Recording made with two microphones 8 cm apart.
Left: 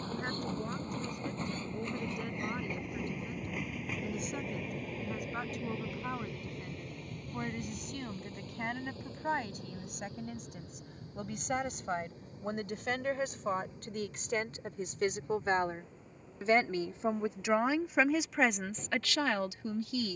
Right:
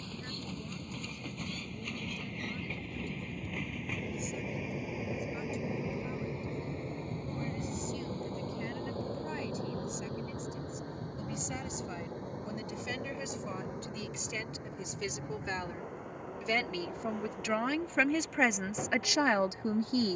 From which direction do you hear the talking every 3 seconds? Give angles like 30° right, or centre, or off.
70° left, 70° left, 70° left, 60° left, 50° left, 30° left, 20° right.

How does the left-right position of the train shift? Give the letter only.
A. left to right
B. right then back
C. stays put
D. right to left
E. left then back
A.